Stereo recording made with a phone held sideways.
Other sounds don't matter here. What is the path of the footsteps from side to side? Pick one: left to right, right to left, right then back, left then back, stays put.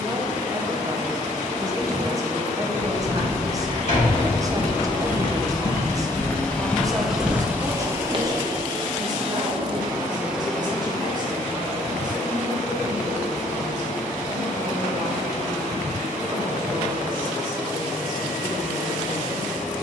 left to right.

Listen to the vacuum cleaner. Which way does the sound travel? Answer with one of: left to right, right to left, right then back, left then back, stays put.
right then back.